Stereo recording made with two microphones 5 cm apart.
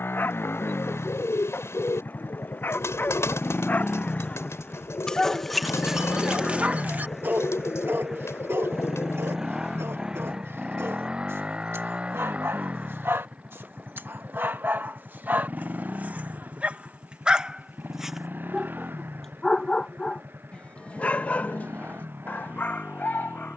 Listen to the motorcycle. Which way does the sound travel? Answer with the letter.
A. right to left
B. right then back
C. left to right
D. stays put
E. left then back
C.